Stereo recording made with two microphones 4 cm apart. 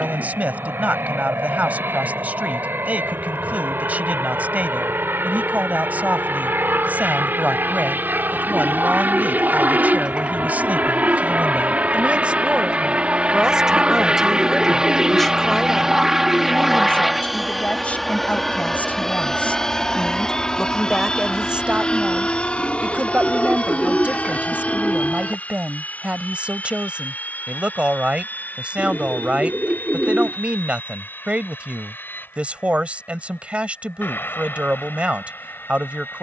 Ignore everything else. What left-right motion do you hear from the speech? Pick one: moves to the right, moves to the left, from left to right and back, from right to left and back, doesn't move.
from right to left and back.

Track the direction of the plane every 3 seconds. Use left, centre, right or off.
right, right, right, right, right, centre, centre, left, left, left, left, left.